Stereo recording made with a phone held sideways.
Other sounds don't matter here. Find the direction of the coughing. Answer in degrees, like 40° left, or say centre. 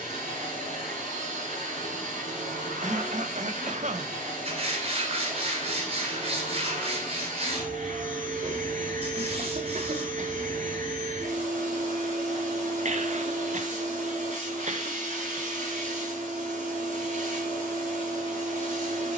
60° right.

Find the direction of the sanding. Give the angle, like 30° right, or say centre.
50° right.